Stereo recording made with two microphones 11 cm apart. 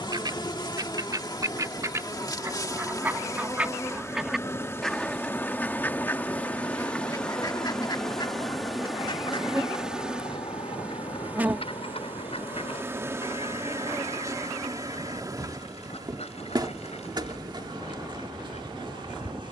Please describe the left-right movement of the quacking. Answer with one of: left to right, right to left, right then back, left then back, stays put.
right to left.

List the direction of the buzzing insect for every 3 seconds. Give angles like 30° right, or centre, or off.
40° left, 20° left, 10° left, 10° right, 30° right, 40° right, 50° right.